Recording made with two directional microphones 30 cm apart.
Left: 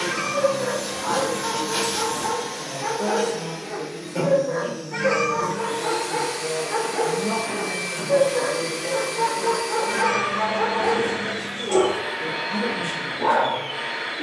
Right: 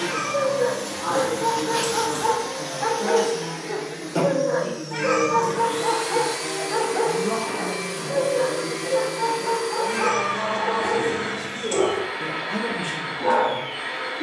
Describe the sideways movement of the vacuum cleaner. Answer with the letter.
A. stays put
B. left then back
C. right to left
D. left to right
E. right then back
E.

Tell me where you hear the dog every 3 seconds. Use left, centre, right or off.
right, right, centre, left, left.